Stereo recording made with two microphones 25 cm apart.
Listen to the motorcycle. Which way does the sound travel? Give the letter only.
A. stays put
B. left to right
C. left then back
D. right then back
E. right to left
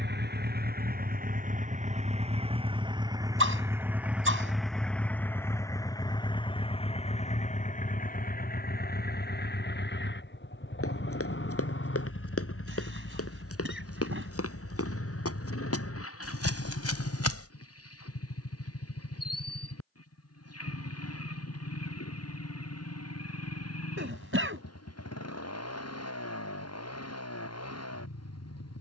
E.